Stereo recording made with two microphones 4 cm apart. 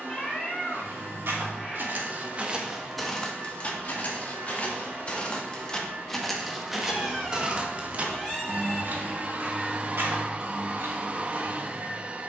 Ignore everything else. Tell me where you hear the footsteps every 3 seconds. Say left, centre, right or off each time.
right, left, right, right.